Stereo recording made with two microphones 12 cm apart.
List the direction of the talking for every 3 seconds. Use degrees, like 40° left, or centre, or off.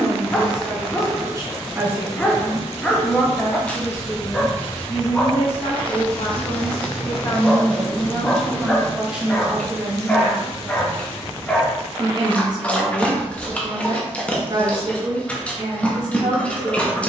30° right, 30° left, 20° left, 20° right, 40° right, 40° right.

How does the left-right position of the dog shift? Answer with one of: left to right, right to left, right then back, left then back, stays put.
stays put.